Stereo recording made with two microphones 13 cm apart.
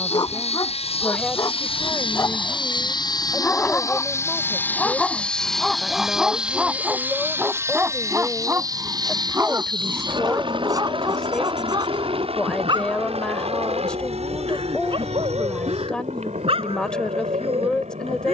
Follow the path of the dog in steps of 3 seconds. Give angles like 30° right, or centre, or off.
30° left, 10° left, 10° right, 30° right, 40° right, 50° right.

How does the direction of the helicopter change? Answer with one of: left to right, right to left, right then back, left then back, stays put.
left to right.